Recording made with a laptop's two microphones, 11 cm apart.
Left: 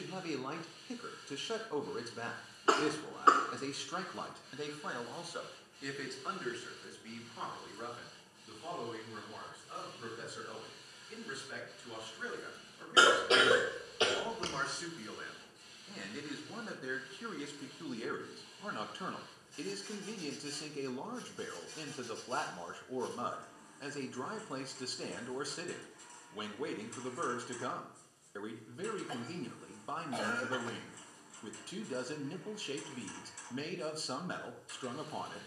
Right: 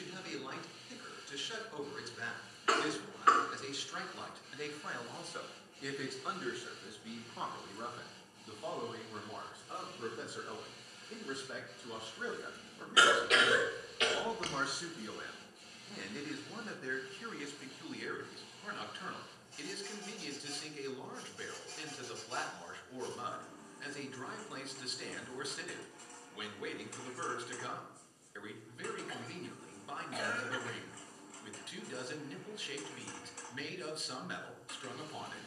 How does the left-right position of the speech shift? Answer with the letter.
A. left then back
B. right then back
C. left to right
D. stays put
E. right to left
B.